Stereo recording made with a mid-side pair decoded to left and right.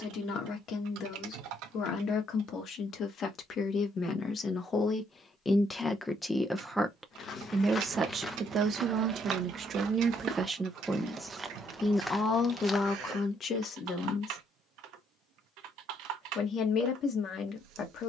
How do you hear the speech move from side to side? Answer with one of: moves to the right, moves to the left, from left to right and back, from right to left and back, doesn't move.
from left to right and back.